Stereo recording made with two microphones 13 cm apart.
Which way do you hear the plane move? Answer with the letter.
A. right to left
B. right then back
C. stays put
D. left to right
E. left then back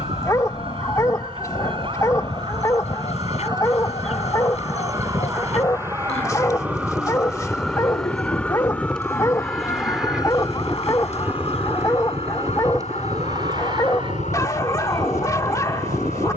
D.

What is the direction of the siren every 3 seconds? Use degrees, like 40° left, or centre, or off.
40° right, 30° right, centre, 30° left, 60° left, 70° left.